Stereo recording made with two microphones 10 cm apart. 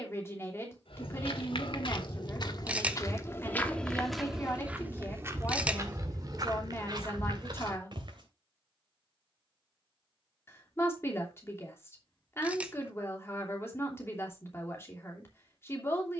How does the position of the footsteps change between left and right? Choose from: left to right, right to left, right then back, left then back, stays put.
left to right.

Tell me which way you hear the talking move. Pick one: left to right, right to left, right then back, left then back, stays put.
stays put.